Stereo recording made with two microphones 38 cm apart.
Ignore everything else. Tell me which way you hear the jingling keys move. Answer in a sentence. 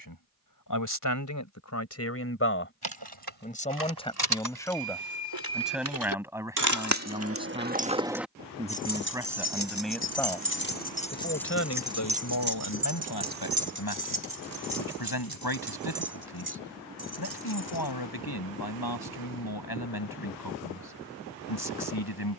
You can hear the jingling keys go left and come back.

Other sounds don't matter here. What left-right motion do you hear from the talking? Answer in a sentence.
In this clip you hear the talking move from left to right and back again.